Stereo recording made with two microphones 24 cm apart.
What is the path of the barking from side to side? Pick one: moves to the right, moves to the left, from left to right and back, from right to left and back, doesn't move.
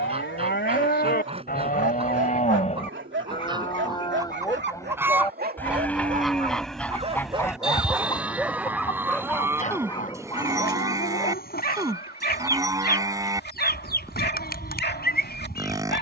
moves to the left.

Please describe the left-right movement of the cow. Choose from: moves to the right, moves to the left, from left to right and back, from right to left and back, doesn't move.
moves to the right.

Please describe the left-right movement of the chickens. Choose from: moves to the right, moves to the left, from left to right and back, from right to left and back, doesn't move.
moves to the left.